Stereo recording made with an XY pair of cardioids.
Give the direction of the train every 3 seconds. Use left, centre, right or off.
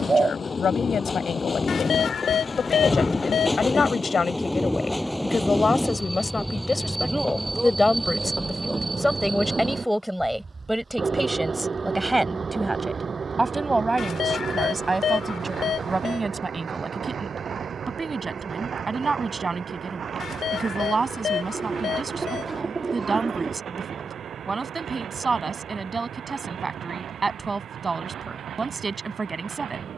left, centre, centre, right, right, right, right, right, right, right.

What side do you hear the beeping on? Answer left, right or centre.
left.